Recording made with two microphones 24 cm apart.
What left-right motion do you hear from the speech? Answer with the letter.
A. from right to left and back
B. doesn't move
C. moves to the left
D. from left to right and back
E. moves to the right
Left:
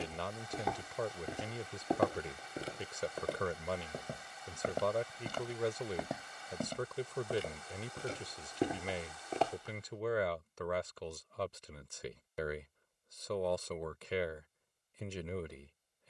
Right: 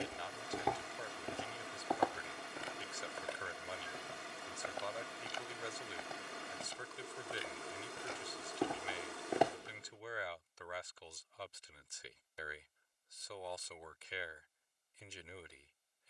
B.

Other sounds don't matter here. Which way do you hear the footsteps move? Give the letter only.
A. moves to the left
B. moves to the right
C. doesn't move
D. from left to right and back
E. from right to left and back
E.